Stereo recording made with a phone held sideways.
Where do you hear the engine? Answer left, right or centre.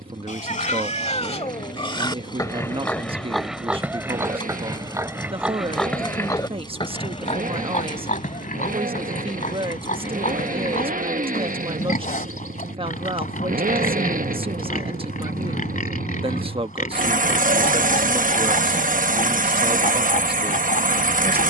right.